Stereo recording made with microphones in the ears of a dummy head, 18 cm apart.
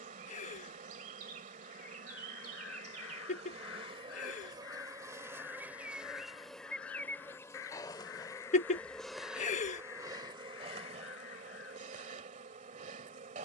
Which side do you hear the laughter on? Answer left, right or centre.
left.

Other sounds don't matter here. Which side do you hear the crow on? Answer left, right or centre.
left.